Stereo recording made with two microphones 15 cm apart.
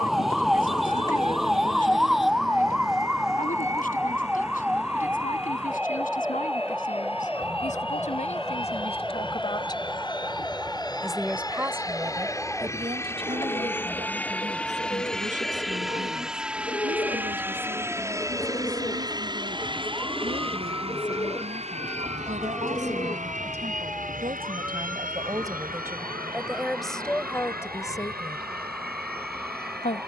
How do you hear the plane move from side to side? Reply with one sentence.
In this clip you hear the plane go from the left side to the right.